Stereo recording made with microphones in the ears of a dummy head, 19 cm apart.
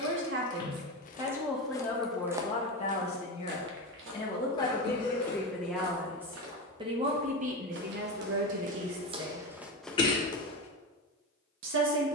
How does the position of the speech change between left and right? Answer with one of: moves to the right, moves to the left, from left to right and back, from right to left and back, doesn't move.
from right to left and back.